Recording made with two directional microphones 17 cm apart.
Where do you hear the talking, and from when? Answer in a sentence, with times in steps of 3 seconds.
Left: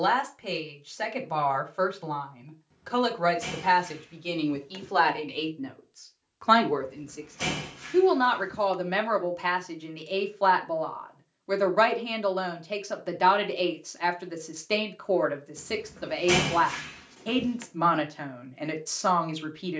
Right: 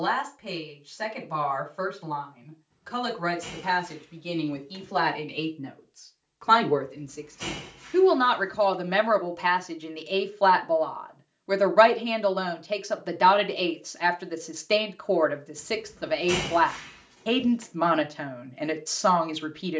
You can hear the talking on the left from 0 s and in the centre from 6 s.